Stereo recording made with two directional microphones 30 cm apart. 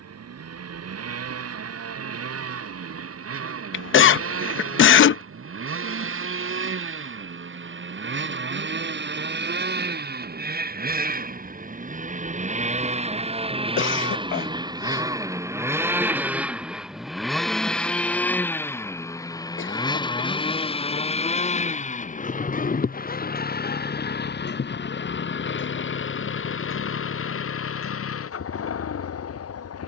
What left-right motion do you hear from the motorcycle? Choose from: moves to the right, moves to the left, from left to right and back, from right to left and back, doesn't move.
moves to the left.